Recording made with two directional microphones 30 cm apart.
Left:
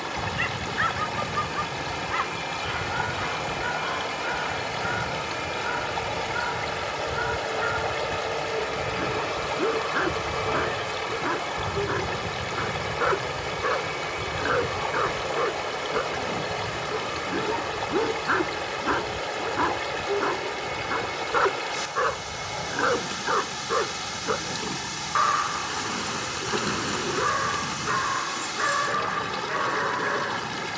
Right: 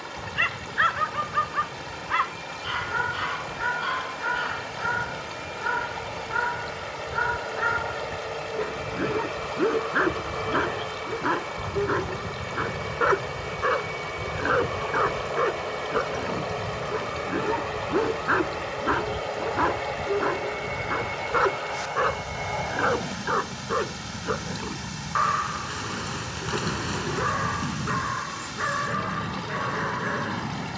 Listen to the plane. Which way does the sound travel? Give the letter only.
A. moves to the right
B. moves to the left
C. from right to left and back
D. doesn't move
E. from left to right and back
A.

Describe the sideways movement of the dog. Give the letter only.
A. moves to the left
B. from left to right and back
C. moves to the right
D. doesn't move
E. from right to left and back
A.